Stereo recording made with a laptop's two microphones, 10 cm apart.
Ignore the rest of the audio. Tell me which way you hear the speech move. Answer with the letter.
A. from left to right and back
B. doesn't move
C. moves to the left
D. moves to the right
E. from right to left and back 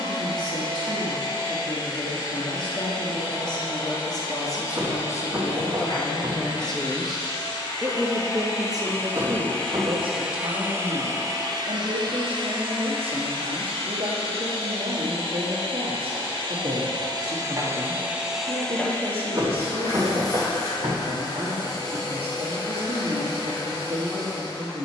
D.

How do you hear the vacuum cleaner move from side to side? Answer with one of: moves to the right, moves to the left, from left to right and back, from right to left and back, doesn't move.
from left to right and back.